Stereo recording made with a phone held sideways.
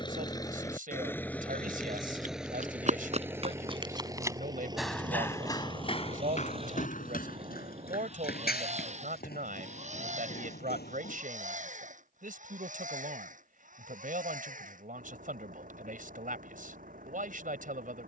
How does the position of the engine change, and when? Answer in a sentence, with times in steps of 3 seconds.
You can hear the engine in the centre from 0 s and on the right from 3 s.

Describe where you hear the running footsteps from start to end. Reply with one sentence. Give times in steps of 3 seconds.
In this clip you hear the running footsteps on the right from 0 s, in the centre from 3 s, on the left from 6 s and not at all from 12 s.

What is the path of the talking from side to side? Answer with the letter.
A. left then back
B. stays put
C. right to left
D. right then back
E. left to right
B.